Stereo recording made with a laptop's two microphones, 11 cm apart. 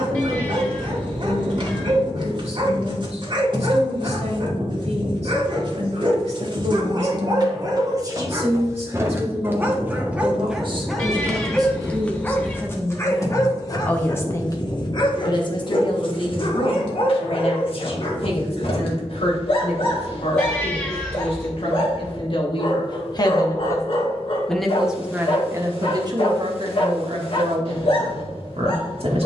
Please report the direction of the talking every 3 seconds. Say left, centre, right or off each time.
right, right, right, right, centre, left, left, left, right, right.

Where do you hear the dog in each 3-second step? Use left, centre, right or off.
right, right, right, centre, left, left, left, left, left, left.